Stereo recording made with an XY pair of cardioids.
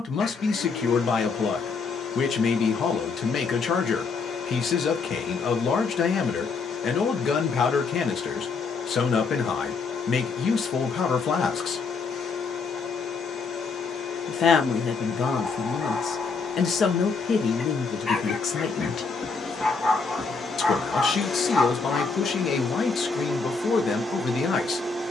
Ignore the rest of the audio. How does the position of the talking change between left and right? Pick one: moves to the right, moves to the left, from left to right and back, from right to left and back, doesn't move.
doesn't move.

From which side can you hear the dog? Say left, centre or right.
left.